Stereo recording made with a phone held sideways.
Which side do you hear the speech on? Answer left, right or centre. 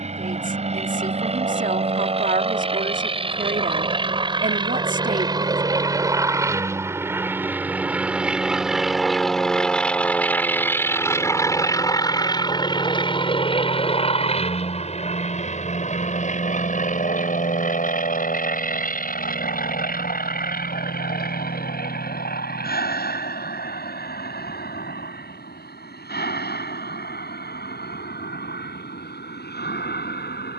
right.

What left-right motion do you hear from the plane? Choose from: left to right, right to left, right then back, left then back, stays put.
right to left.